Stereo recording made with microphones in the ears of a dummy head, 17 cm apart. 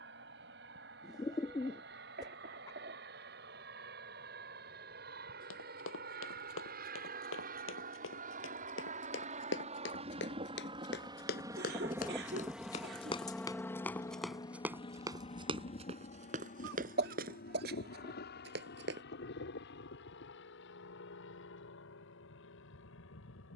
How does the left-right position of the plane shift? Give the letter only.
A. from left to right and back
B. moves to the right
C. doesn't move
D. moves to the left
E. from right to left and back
D.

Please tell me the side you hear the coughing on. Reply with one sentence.
In this clip you hear the coughing on the right.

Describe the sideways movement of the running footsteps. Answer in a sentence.
You can hear the running footsteps move from left to right.